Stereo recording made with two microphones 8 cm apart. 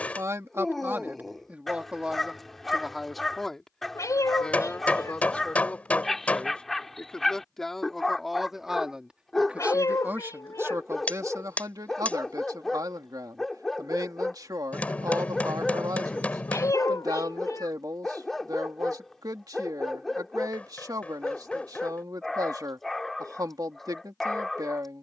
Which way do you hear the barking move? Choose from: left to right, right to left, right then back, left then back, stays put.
stays put.